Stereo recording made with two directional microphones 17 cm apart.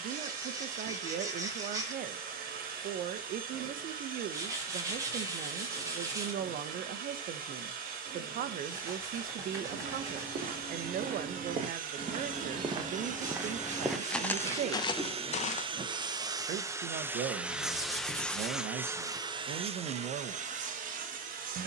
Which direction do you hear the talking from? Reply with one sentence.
In this clip you hear the talking on the right.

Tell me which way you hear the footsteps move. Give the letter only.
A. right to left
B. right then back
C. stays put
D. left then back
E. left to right
A.